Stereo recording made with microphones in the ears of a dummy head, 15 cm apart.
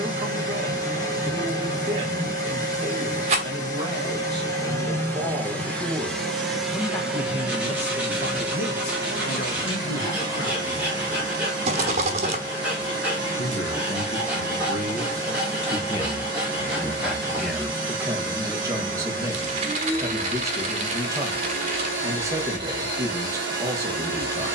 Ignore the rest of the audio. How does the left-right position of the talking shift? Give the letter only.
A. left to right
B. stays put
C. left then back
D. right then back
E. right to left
C.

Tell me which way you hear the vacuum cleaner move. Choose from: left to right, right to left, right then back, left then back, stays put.
left to right.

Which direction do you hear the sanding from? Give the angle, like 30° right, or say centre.
10° right.